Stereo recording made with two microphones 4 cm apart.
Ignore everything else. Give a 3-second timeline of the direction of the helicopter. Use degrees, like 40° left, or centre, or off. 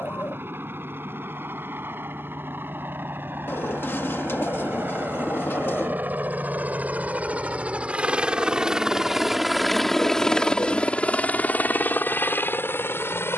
60° right, 50° right, 30° right, 20° left, 50° left.